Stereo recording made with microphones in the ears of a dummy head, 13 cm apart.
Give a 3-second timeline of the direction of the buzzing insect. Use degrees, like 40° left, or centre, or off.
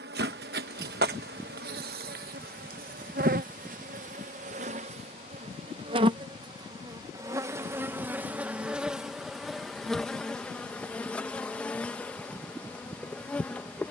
70° right, 50° right, 20° right, centre, 10° left.